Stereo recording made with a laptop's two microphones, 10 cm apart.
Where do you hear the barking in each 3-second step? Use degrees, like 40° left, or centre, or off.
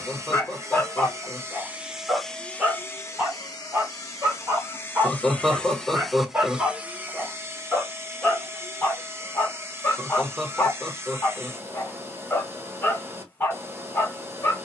10° left, 20° right, centre, 20° left, 20° left.